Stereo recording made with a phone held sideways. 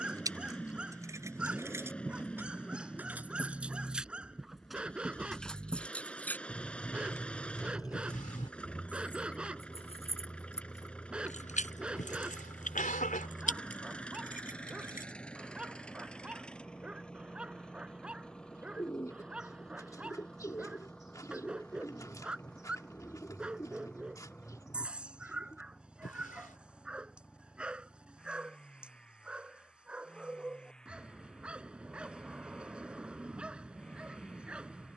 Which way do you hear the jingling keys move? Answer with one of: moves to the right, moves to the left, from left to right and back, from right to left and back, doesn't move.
moves to the left.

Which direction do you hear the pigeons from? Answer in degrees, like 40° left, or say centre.
20° left.